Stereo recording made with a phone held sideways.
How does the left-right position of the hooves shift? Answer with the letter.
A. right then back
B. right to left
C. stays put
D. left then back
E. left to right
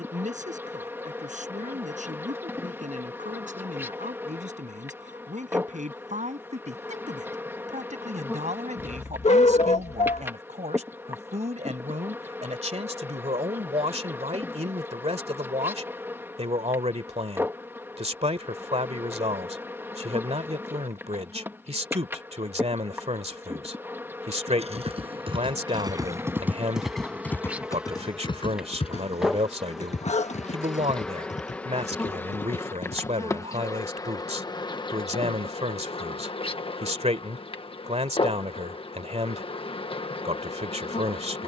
B.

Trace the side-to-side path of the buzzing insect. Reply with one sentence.
In this clip you hear the buzzing insect move to the left.